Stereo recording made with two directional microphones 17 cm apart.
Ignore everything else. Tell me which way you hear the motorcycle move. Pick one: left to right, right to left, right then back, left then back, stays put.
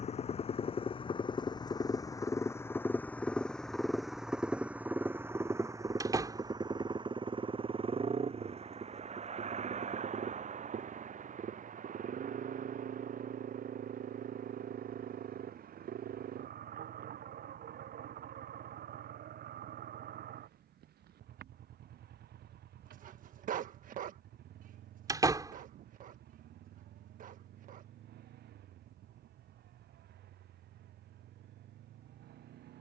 left to right.